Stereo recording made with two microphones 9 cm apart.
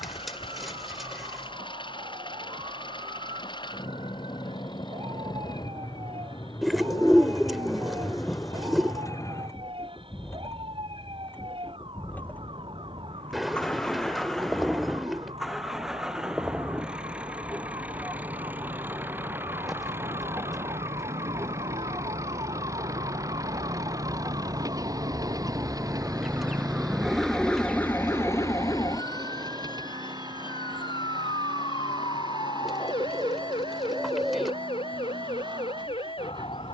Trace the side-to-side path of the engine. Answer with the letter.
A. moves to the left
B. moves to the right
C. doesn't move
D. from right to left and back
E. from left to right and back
B.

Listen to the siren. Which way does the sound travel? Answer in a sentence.
In this clip you hear the siren travel towards the left.